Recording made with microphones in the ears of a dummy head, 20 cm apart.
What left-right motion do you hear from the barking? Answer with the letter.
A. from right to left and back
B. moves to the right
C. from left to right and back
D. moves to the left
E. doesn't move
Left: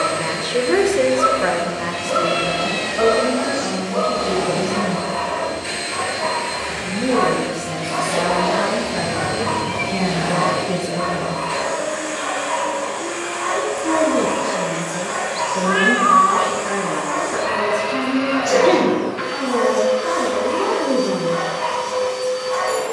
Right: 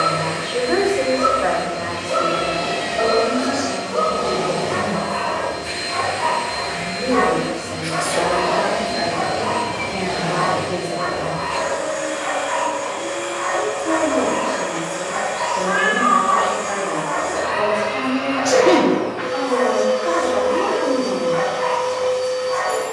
C.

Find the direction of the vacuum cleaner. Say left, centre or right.
left.